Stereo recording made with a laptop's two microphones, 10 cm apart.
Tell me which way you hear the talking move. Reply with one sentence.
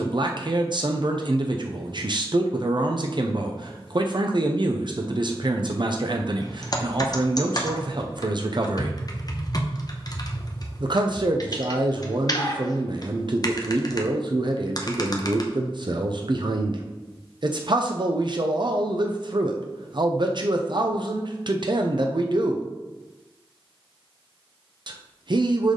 In this clip you hear the talking stay put.